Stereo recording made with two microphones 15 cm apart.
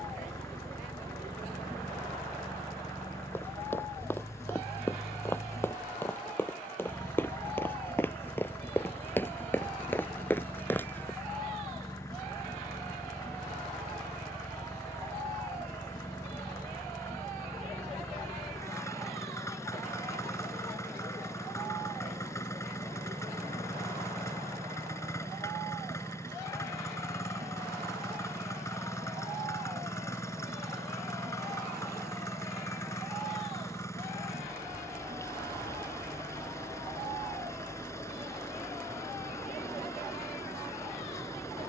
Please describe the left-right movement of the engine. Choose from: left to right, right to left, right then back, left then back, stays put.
stays put.